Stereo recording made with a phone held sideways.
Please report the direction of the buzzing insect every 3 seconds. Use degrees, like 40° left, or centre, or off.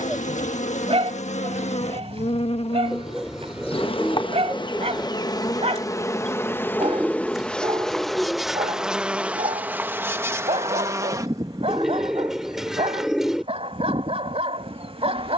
60° left, 40° left, 10° left, 20° right, 40° right.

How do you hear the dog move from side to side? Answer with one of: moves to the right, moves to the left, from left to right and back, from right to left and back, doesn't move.
doesn't move.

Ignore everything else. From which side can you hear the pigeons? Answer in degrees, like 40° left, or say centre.
centre.